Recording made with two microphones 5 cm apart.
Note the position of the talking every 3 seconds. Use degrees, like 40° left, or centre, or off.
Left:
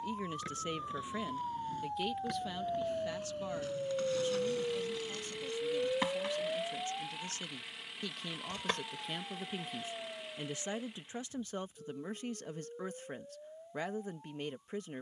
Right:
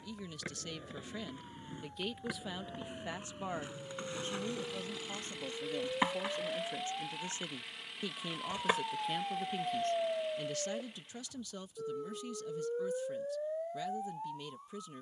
10° left, 30° right, 20° right, 20° left, 40° left.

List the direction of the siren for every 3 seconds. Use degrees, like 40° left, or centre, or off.
60° left, 40° left, 10° right, 50° right, 70° right.